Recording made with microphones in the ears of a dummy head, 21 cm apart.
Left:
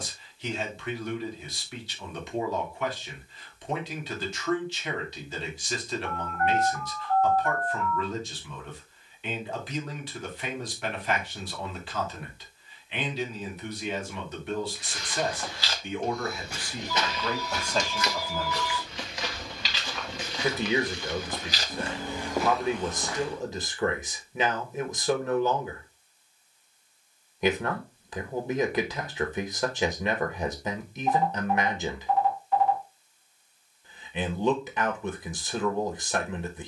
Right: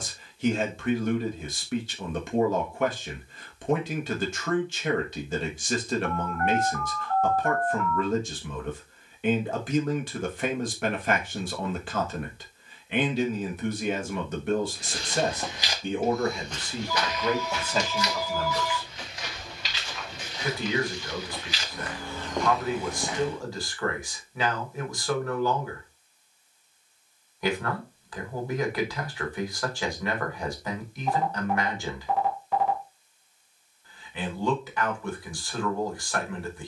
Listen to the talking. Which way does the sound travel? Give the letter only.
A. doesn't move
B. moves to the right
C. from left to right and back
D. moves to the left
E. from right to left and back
D.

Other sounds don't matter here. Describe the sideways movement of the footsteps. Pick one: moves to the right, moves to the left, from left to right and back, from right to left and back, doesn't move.
from right to left and back.